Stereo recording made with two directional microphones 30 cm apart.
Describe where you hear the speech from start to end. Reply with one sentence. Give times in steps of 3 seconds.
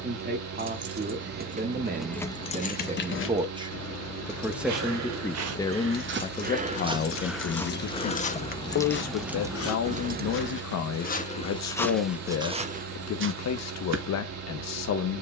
In this clip you hear the speech on the right from 0 s, in the centre from 3 s and on the left from 6 s.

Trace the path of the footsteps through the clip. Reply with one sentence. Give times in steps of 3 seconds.
In this clip you hear the footsteps not at all from 0 s, on the right from 3 s, in the centre from 6 s, on the left from 9 s and on the right from 12 s.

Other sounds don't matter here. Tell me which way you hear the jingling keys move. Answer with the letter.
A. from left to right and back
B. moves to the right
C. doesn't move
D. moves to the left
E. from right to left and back
E.